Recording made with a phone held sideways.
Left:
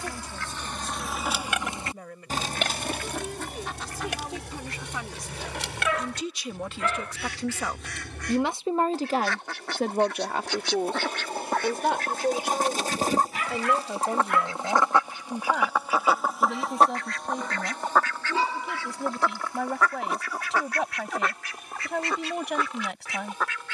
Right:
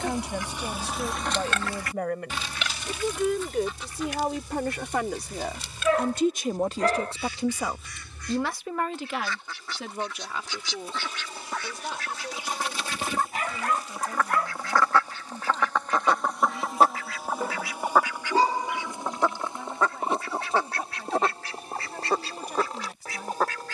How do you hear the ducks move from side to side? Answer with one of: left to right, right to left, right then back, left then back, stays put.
left then back.